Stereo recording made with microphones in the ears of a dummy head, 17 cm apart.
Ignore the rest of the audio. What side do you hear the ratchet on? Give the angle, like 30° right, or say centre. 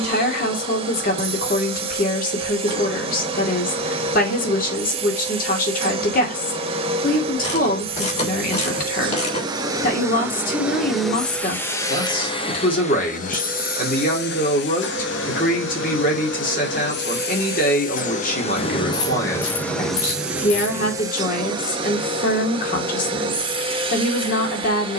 40° left.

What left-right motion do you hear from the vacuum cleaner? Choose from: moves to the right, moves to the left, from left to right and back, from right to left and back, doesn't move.
from right to left and back.